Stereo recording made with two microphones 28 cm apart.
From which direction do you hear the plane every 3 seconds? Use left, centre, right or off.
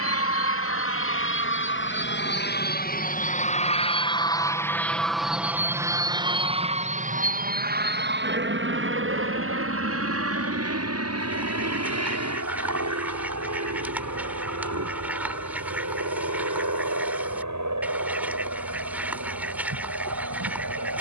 left, centre, right, right, right, right, right.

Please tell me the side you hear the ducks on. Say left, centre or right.
centre.